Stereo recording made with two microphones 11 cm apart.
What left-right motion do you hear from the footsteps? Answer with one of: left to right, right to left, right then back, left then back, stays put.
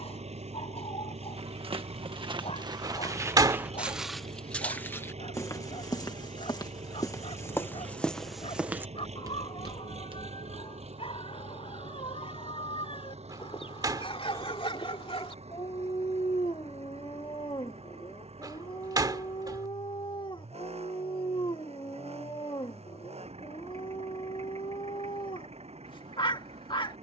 left then back.